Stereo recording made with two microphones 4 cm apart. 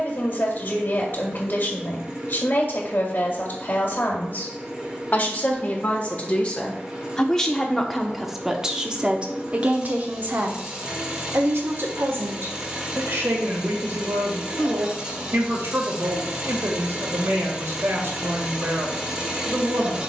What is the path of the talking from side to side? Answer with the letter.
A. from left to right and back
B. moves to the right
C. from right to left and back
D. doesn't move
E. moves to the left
B.